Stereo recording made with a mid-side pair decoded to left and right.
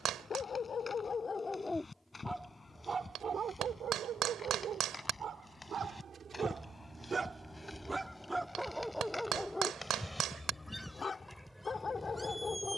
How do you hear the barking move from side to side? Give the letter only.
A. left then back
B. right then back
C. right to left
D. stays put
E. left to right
B.